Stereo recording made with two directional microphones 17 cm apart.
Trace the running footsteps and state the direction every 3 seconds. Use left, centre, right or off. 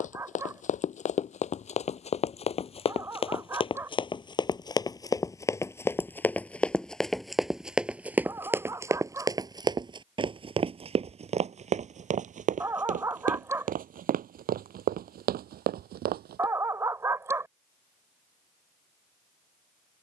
left, left, centre, right, right, right, off.